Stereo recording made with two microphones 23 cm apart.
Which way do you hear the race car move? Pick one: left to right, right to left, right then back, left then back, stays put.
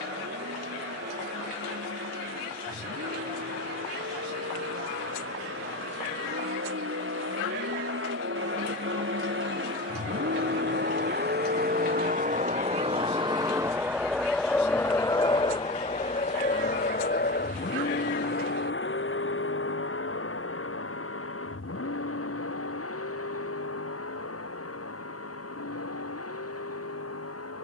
right to left.